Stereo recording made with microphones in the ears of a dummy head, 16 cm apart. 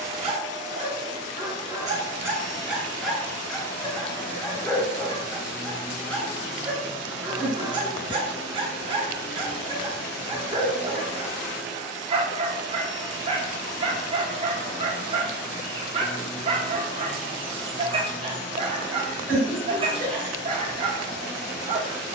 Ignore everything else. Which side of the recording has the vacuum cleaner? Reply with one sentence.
In this clip you hear the vacuum cleaner on the left.